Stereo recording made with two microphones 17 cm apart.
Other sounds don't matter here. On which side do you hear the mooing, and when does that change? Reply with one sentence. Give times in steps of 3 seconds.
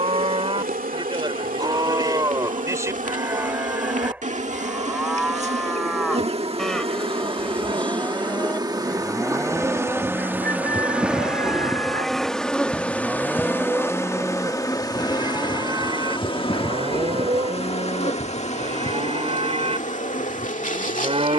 In this clip you hear the mooing on the right from 0 s, in the centre from 3 s and on the right from 15 s.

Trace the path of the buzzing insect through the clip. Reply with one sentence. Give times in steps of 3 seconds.
You can hear the buzzing insect on the right from 0 s, in the centre from 9 s and on the left from 15 s.